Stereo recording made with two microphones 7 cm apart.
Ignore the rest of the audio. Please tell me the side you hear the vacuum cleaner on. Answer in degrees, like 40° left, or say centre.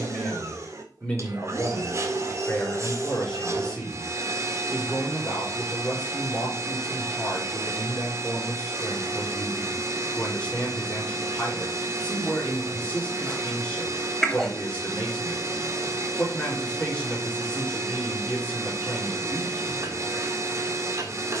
40° right.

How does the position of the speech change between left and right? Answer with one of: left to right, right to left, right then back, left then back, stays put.
stays put.